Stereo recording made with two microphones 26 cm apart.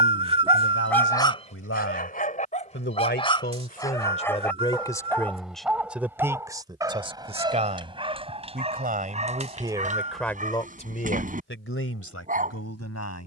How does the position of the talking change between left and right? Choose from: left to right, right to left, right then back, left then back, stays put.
right then back.